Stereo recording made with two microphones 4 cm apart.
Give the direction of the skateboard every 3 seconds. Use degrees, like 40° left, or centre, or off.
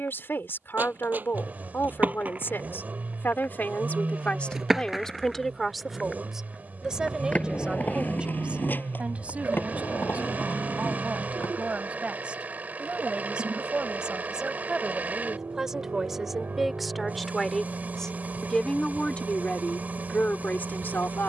40° right, 10° right, 40° left, 60° left, off, off, off.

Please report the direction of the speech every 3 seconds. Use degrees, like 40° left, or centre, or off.
60° left, 30° left, 20° right, 30° right, 20° right, centre, 40° left.